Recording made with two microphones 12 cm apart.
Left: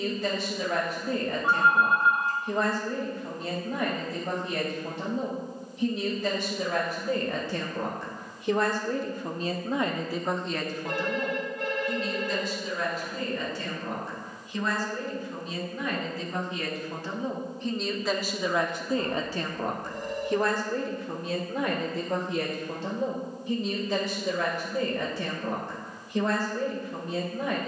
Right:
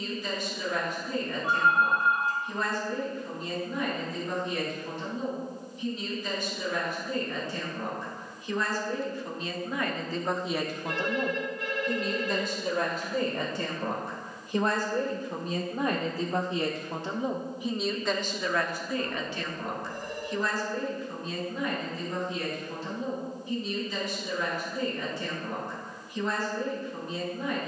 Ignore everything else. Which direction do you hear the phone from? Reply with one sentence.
In this clip you hear the phone on the left.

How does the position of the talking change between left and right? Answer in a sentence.
In this clip you hear the talking move from left to right and back again.